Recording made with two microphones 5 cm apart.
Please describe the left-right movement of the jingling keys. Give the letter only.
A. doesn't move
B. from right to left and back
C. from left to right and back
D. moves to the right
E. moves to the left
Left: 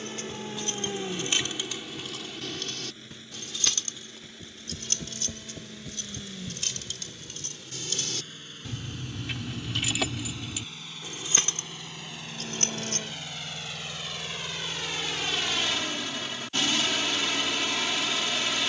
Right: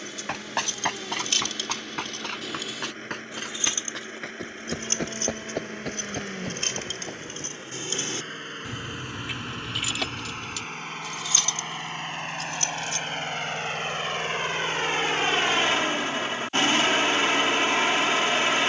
C.